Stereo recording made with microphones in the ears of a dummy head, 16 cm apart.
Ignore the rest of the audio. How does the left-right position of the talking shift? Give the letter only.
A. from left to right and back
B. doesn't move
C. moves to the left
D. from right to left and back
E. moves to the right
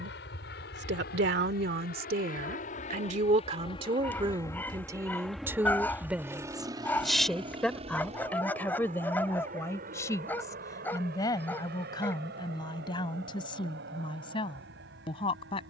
C.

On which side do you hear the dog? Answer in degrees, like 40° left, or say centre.
10° left.